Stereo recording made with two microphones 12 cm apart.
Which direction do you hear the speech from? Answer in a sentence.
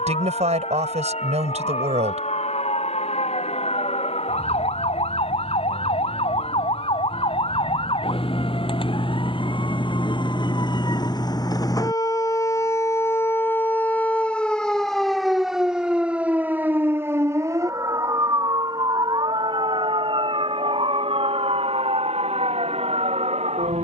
In this clip you hear the speech on the right.